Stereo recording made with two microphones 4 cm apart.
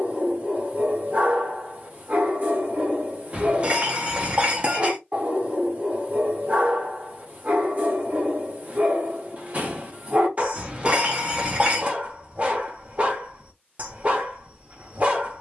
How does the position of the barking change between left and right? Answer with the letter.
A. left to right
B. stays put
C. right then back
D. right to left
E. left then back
B.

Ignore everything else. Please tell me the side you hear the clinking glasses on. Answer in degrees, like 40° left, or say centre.
30° right.